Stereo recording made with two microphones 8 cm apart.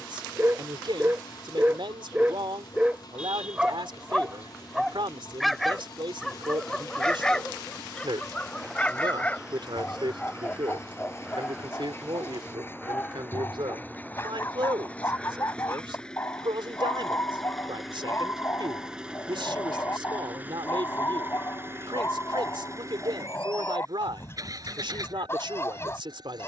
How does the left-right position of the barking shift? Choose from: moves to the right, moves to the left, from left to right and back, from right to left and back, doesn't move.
moves to the left.